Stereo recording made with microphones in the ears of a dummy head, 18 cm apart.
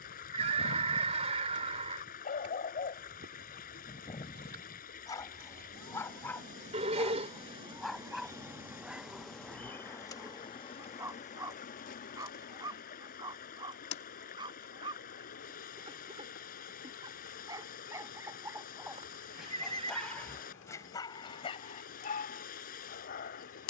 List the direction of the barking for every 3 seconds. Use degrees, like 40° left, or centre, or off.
50° left, 20° left, centre, 10° right, 20° right, 20° right, centre, 40° left.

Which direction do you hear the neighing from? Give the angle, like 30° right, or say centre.
30° right.